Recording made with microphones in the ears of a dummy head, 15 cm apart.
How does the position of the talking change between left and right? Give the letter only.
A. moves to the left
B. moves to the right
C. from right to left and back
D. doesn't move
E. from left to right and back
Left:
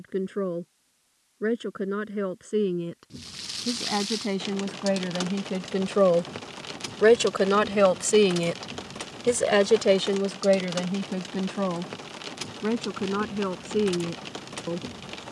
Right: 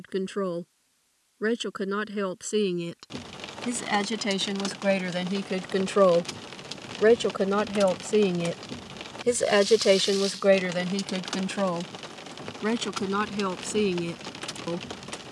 C.